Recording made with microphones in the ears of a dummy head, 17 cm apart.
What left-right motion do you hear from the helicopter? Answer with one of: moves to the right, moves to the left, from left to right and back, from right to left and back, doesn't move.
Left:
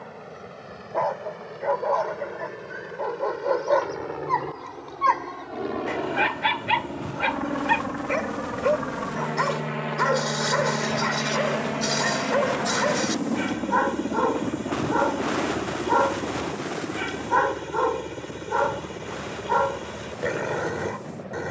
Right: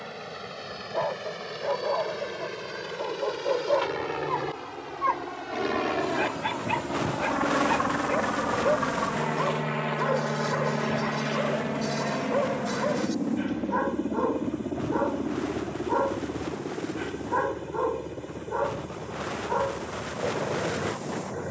moves to the left.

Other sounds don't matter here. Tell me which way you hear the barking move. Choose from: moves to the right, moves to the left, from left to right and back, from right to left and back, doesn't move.
doesn't move.